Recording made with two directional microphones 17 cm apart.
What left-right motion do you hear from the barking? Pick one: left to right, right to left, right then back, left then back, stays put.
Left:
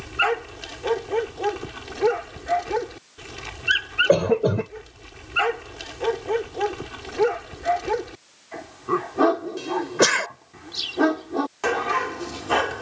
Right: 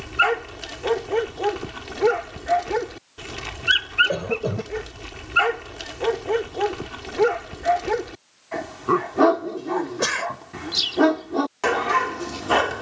stays put.